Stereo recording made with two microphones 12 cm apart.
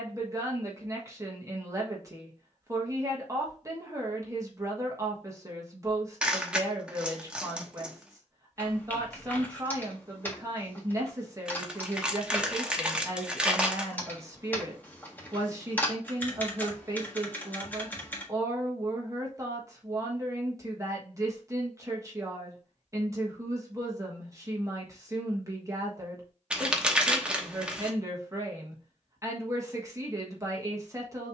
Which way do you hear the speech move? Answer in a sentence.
You can hear the speech stay put.